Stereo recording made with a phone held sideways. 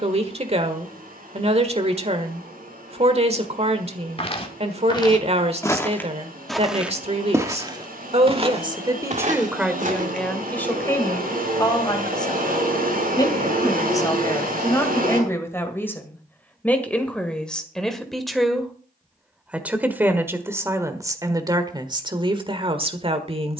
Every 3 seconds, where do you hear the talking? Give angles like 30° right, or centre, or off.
40° right, 40° right, 40° right, 10° left, 20° left, 10° left, 10° right, 30° right.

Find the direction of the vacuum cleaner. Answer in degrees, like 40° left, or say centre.
70° right.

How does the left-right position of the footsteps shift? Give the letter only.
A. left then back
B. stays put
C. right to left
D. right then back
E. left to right
E.